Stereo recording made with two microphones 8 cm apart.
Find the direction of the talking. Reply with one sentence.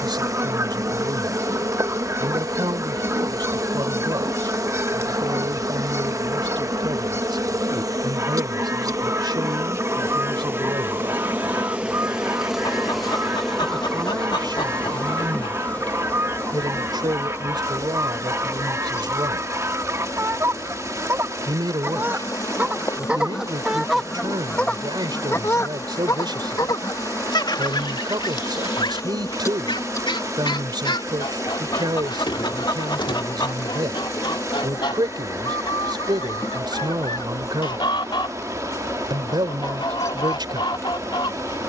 You can hear the talking on the right.